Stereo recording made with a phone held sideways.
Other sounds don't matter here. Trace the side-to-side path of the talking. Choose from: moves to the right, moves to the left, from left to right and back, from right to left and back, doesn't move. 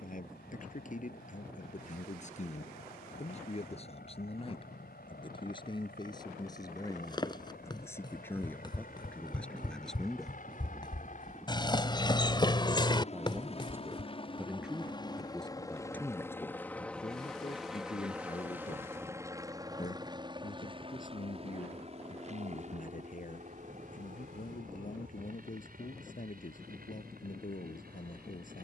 from left to right and back.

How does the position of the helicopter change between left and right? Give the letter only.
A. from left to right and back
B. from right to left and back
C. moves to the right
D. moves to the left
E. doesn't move
C.